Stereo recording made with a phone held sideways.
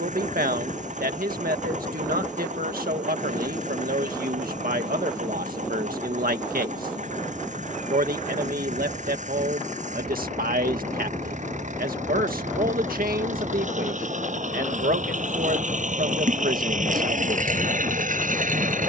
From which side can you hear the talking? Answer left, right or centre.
right.